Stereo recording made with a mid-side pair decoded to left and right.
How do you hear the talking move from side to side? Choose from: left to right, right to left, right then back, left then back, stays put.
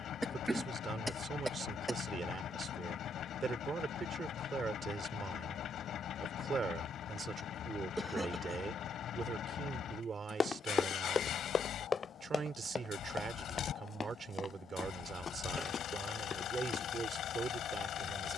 stays put.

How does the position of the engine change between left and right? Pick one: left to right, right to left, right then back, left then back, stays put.
stays put.